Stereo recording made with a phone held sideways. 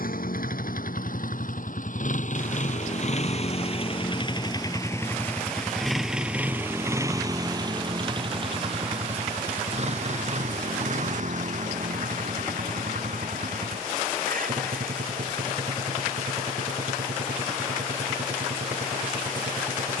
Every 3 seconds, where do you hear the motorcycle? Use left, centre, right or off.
left, left, right, right, right, right, right.